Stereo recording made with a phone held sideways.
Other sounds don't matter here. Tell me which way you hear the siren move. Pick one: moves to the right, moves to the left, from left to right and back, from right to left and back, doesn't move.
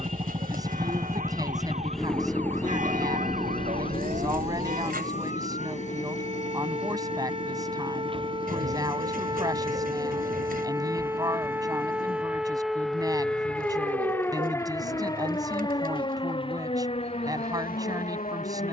moves to the left.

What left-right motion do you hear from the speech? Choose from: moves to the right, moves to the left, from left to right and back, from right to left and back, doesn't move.
doesn't move.